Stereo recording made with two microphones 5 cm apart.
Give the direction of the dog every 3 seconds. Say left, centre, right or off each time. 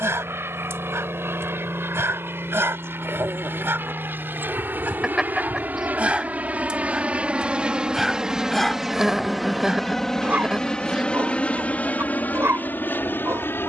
right, right, centre, right, right.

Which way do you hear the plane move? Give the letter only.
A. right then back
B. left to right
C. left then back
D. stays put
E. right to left
E.